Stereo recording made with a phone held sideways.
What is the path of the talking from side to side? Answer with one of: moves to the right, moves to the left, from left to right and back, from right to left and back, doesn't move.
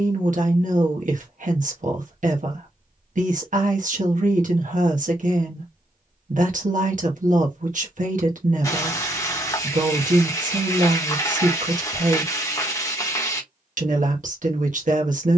doesn't move.